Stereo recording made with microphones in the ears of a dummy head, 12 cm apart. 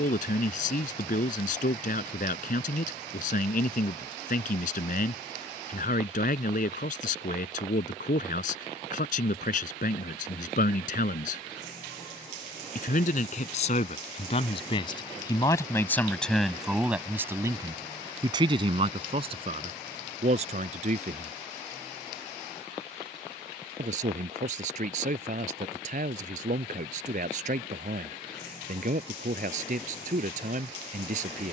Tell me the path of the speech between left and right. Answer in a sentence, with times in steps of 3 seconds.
You can hear the speech on the left from 0 s, in the centre from 15 s and on the right from 18 s.